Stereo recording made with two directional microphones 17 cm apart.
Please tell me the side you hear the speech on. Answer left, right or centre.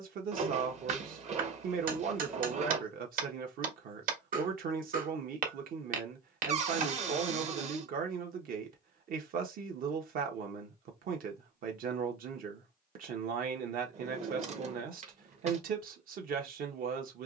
right.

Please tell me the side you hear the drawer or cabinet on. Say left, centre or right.
right.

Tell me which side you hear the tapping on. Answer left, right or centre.
right.